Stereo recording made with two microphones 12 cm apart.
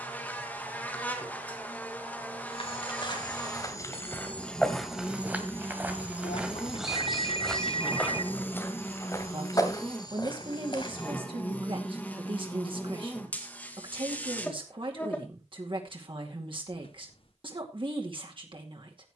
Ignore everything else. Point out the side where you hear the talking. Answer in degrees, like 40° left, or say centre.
50° right.